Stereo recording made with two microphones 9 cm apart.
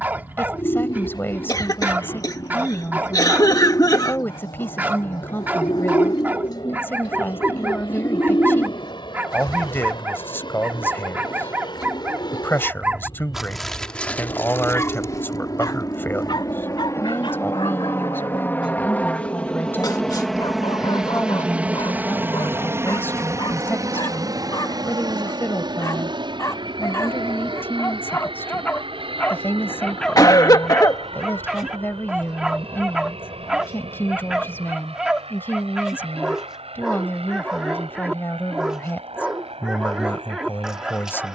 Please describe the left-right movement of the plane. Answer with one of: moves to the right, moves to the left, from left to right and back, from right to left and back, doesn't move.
moves to the right.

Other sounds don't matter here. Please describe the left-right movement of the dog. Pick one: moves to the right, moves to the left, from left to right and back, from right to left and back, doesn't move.
from right to left and back.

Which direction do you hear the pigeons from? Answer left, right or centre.
left.